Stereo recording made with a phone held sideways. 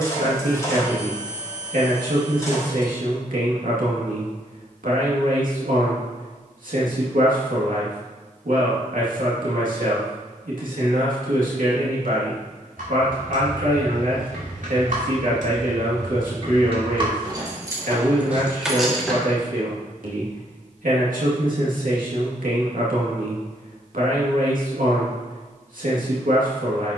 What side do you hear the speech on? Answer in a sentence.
In this clip you hear the speech on the right.